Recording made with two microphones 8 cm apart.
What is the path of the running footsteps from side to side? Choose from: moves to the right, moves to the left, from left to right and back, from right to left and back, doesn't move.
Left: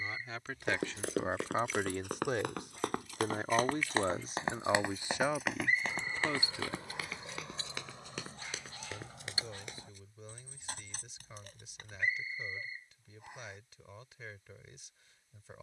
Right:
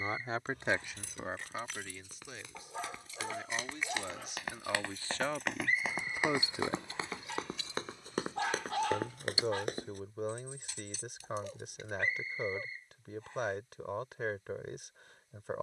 moves to the right.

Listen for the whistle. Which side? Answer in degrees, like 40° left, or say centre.
10° left.